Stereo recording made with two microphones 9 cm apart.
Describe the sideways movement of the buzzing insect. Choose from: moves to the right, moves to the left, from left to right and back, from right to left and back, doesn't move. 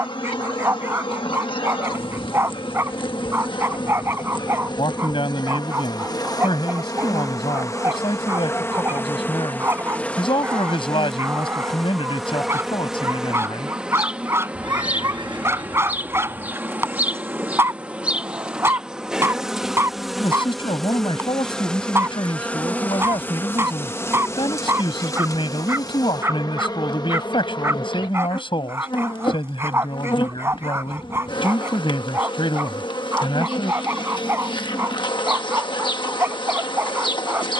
from left to right and back.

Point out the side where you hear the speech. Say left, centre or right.
left.